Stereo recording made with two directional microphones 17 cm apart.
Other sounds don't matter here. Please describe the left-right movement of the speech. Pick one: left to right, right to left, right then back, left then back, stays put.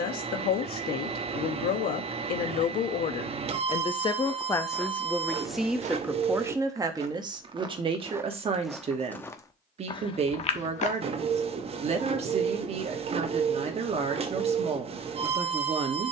left to right.